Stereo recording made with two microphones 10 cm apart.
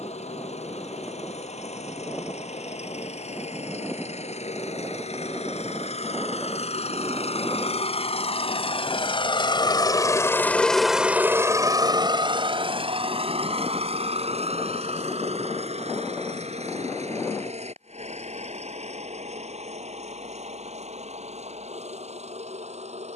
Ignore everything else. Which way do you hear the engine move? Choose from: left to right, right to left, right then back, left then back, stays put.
left to right.